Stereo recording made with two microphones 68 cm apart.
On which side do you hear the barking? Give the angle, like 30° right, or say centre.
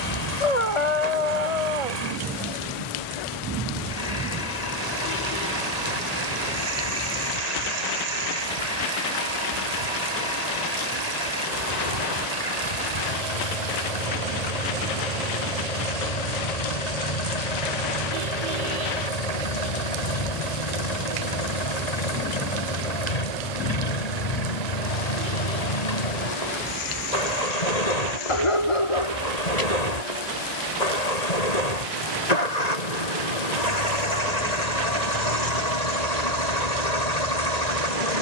50° left.